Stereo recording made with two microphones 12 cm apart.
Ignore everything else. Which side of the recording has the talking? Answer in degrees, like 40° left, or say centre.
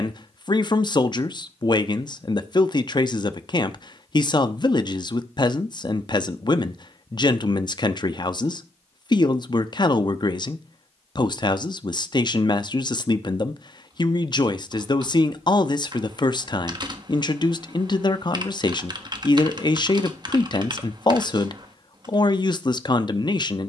40° left.